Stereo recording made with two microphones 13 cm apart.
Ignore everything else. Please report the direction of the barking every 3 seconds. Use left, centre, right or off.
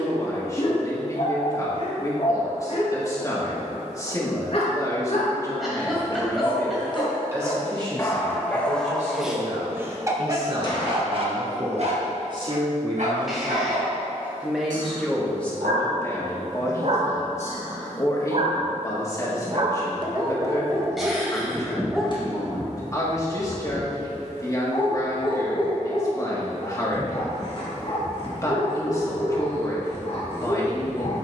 left, left, left, right, right, right, right, centre, left, left, left.